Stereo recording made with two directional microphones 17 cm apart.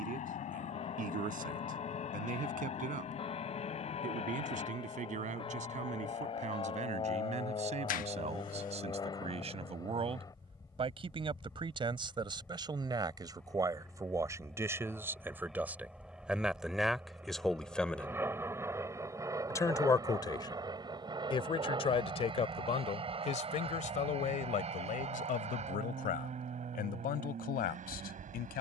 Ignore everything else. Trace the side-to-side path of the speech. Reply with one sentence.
In this clip you hear the speech move from right to left.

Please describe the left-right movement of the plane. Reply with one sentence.
You can hear the plane move to the right.